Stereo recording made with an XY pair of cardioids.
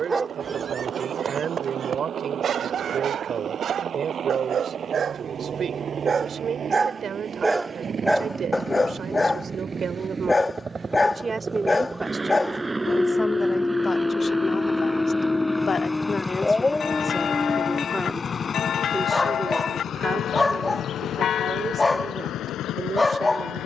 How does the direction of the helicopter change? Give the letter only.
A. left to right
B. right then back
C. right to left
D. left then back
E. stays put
C.